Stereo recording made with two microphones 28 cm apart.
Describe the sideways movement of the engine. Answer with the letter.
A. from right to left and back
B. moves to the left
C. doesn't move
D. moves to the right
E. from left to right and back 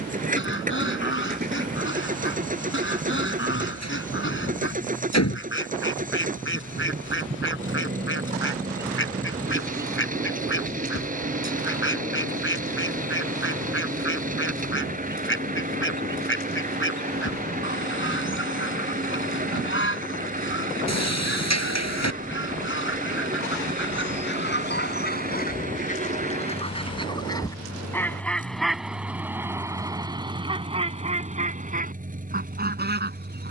C.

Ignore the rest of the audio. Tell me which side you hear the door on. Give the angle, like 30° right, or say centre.
70° left.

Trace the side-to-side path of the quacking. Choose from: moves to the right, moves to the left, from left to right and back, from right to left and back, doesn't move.
moves to the right.